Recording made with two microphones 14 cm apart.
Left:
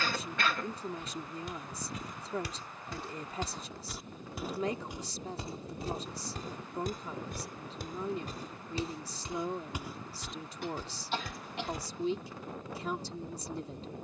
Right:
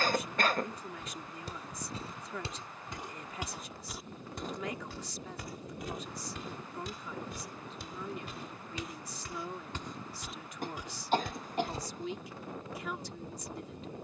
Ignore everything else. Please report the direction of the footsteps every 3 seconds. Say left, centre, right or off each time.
right, centre, left, centre, off.